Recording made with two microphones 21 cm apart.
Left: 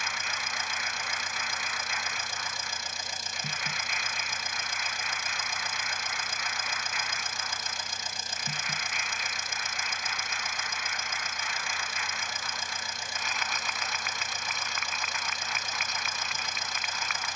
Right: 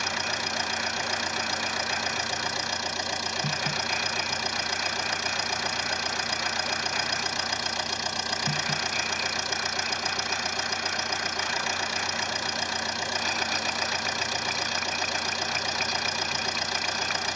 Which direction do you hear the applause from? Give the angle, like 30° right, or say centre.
40° right.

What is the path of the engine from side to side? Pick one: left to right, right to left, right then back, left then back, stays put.
stays put.